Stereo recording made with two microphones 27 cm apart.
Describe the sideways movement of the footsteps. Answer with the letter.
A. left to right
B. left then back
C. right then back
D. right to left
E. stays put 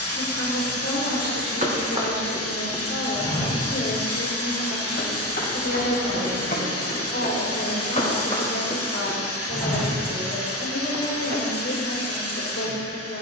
B.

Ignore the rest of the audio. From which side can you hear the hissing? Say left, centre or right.
left.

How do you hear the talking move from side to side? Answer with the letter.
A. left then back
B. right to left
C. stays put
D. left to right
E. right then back
C.